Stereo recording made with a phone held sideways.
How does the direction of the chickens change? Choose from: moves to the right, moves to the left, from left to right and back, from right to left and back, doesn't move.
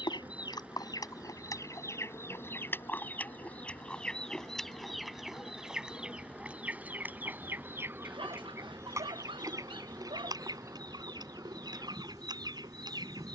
moves to the right.